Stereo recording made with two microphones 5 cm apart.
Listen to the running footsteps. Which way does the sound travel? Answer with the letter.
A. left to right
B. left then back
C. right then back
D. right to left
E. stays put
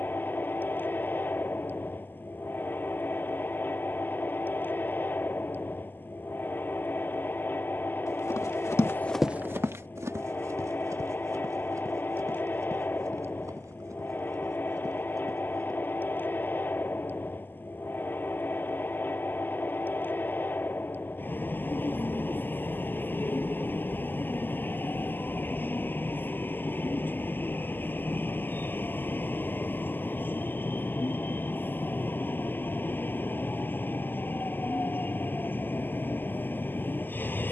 A.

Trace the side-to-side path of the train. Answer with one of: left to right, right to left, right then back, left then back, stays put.
stays put.